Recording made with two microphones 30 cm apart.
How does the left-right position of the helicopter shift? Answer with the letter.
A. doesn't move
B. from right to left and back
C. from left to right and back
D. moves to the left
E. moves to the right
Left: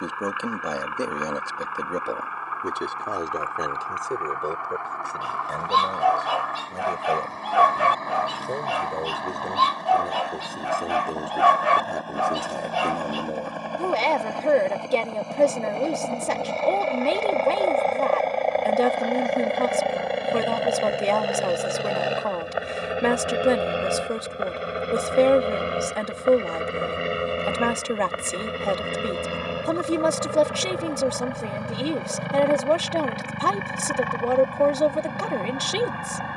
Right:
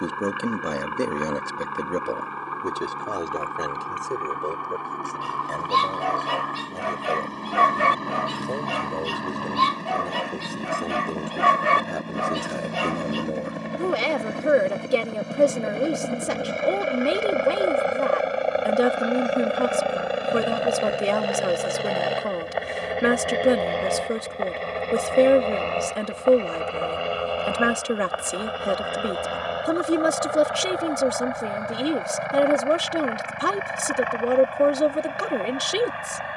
D.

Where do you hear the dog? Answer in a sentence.
In this clip you hear the dog on the right.